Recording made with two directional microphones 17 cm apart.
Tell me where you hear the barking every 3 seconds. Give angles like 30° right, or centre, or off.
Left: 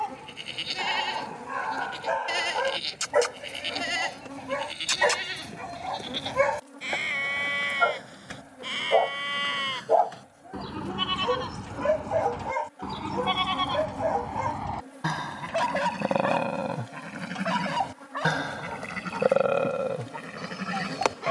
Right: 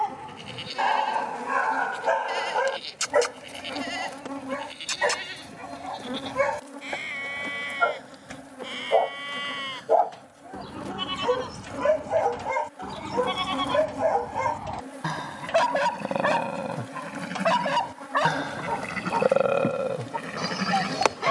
40° right, 10° left, 10° left, 10° right, 30° right, 50° right, 60° right.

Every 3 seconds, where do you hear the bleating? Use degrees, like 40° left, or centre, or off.
30° left, 30° left, 30° left, 20° left, 20° left, centre, 20° right.